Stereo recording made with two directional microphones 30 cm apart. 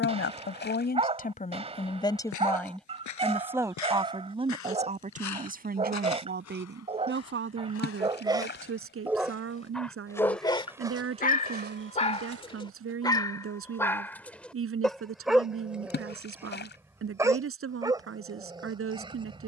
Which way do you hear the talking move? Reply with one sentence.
In this clip you hear the talking travel towards the right.